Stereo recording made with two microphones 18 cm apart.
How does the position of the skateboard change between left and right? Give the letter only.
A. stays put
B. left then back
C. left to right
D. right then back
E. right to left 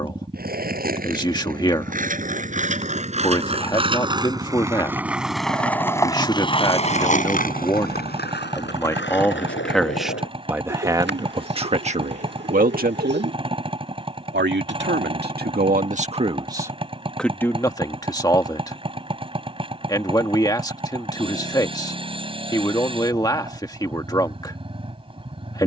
E.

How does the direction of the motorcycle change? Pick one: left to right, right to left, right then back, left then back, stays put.
stays put.